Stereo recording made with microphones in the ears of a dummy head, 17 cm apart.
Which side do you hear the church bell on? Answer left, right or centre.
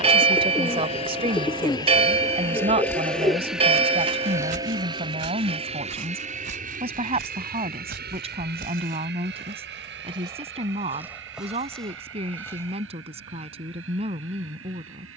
right.